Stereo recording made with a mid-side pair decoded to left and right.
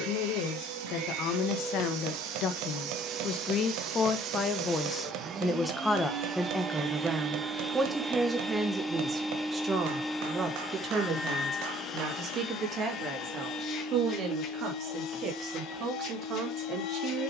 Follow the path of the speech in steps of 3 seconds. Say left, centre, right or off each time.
left, left, centre, right, right, right.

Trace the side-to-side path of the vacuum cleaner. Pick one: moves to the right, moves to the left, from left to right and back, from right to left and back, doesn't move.
moves to the left.